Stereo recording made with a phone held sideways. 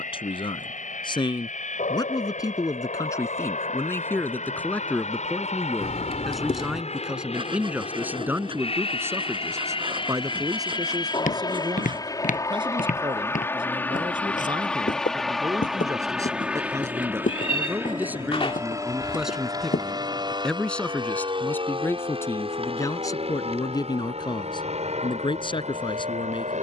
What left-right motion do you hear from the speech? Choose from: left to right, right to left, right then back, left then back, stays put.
right then back.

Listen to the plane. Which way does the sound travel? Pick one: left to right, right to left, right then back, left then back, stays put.
left to right.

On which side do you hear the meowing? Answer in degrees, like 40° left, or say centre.
40° left.